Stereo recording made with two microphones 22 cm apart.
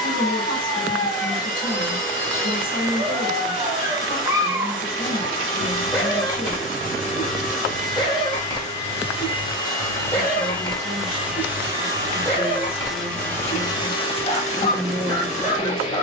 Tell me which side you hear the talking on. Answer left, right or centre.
left.